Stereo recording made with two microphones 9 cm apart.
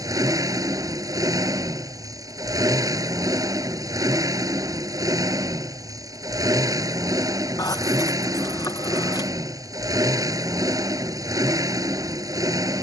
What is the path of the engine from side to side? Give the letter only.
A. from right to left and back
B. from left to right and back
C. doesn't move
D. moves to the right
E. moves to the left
C.